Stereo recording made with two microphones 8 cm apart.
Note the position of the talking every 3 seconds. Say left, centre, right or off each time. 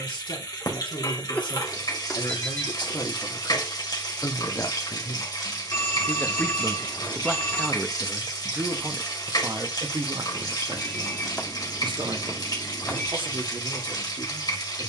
left, left, centre, right, right.